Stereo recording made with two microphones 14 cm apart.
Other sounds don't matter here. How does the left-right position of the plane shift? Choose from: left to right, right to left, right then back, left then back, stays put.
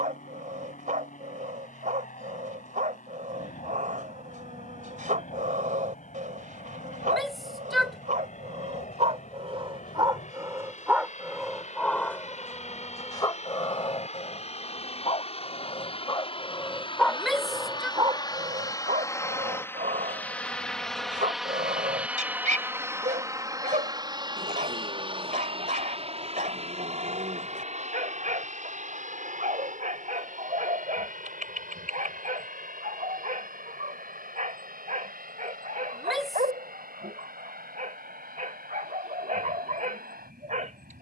left to right.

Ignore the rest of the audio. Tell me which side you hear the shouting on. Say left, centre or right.
centre.